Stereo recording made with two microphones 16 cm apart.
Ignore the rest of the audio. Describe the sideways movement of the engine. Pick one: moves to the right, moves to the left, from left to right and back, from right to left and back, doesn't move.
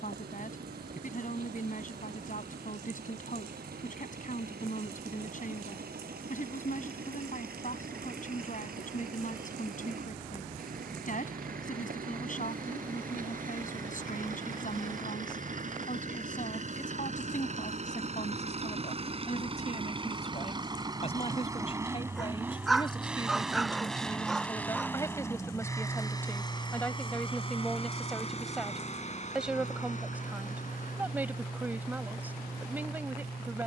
moves to the left.